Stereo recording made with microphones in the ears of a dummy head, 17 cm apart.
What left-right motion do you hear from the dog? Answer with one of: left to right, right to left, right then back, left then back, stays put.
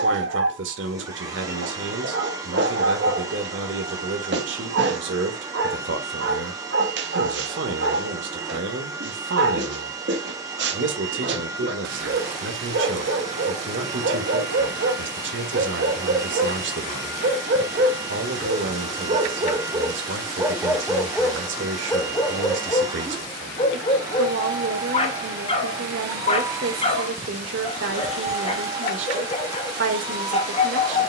right to left.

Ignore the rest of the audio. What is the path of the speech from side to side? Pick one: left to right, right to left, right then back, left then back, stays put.
stays put.